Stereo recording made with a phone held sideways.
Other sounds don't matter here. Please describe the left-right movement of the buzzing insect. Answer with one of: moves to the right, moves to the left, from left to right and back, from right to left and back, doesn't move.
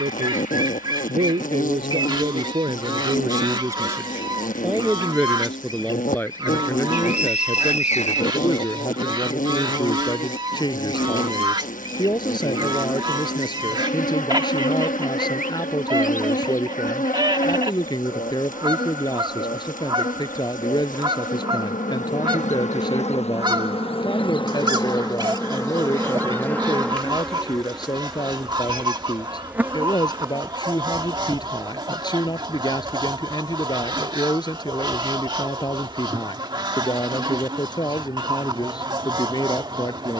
moves to the right.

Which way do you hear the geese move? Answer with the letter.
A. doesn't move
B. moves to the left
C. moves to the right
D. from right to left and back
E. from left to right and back
A.